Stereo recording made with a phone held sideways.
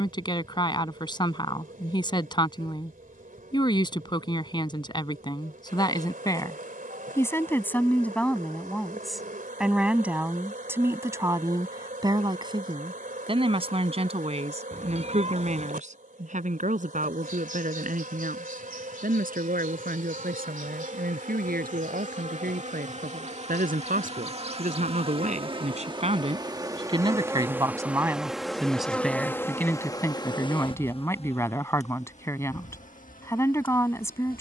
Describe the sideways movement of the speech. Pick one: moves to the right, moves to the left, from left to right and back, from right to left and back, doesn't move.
from left to right and back.